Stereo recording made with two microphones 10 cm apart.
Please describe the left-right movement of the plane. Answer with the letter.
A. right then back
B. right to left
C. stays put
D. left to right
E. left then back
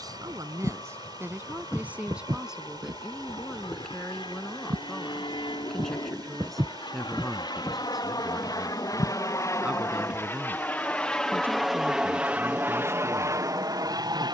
D.